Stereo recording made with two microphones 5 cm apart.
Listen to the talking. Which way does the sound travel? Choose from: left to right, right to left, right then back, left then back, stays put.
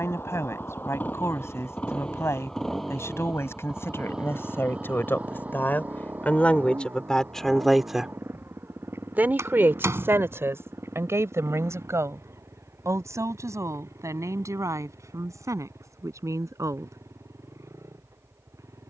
left to right.